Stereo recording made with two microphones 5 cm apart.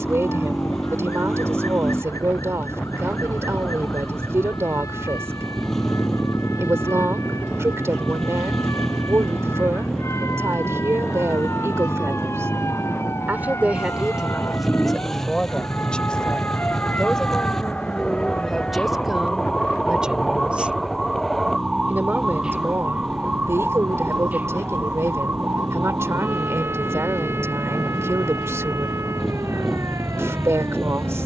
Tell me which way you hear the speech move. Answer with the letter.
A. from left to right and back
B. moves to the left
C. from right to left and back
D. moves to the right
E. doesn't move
C.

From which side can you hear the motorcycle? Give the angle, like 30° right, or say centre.
10° left.